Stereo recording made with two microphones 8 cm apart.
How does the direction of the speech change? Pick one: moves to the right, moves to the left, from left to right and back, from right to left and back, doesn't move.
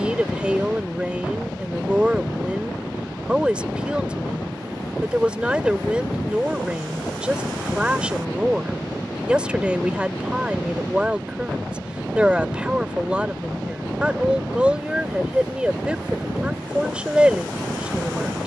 doesn't move.